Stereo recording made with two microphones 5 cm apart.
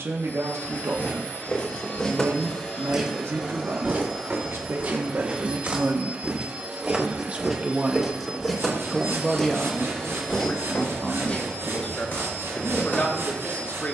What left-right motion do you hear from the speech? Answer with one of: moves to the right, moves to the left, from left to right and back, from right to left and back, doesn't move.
moves to the left.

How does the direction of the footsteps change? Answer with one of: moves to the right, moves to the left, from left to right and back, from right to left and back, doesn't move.
from left to right and back.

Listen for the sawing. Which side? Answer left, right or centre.
right.